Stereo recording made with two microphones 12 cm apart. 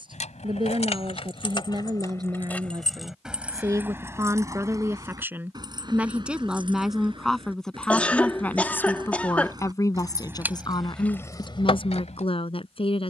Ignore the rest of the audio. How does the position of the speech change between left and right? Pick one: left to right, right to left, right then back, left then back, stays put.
right to left.